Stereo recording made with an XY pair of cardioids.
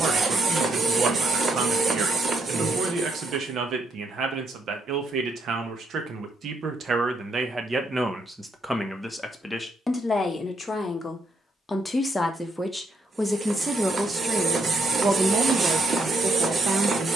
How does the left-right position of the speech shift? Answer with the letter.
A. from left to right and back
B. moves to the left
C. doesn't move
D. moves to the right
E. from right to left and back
E.